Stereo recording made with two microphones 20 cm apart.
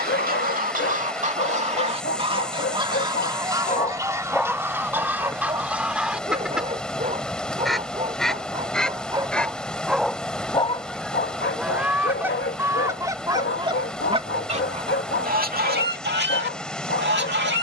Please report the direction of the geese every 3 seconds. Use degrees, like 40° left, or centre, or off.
40° right, 10° right, centre, centre, 20° right, 60° right.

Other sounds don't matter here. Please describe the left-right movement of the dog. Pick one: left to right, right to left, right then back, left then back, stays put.
right then back.